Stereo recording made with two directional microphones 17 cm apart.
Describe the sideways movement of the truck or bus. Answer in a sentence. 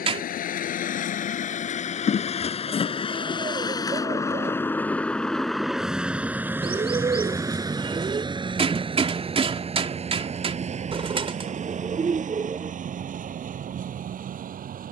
In this clip you hear the truck or bus move to the right.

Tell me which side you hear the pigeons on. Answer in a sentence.
In this clip you hear the pigeons on the right.